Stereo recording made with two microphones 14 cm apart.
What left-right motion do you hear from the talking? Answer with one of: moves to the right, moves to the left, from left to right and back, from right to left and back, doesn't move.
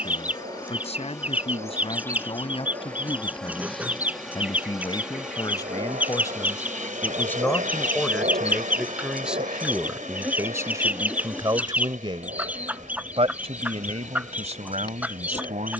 moves to the right.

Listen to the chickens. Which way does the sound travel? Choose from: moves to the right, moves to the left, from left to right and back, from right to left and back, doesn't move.
doesn't move.